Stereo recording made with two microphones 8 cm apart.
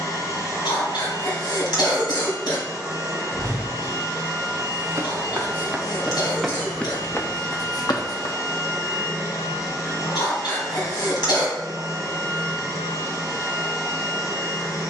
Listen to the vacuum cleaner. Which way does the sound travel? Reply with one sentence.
In this clip you hear the vacuum cleaner stay put.